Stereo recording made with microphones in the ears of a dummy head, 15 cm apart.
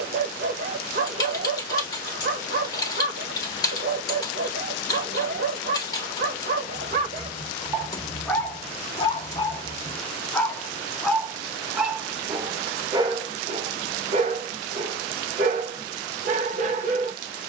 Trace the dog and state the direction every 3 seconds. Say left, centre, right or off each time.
right, right, right, centre, right, right.